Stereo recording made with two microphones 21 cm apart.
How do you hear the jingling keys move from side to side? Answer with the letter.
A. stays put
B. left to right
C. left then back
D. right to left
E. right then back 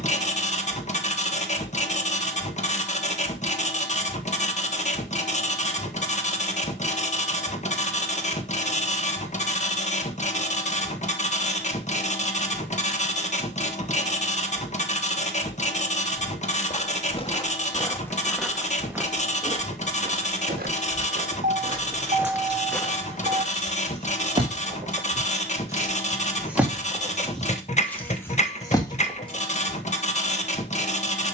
D.